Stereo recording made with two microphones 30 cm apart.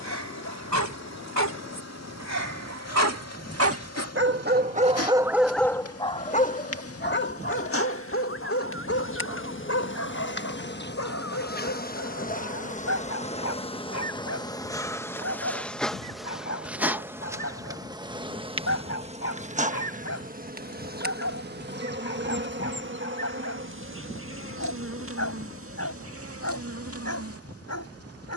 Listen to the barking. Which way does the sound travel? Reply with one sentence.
In this clip you hear the barking move to the left.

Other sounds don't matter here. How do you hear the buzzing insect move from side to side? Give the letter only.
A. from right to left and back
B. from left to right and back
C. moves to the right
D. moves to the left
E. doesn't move
C.